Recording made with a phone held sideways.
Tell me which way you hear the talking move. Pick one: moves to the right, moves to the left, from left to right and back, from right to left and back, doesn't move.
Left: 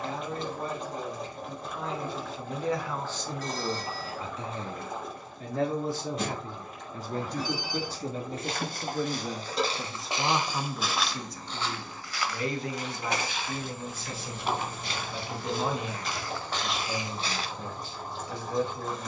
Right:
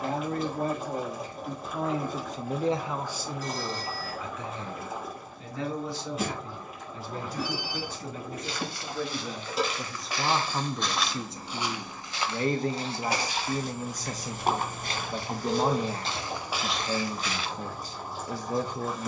from right to left and back.